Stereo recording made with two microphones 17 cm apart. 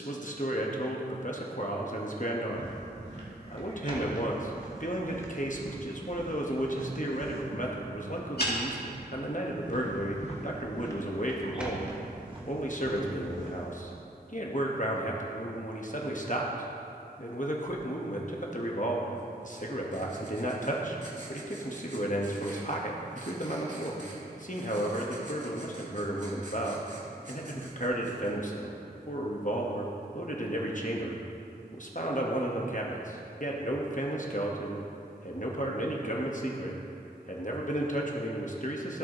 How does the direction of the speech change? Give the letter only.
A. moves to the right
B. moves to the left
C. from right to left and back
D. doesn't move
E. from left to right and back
D.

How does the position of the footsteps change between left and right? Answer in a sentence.
You can hear the footsteps move from right to left and back again.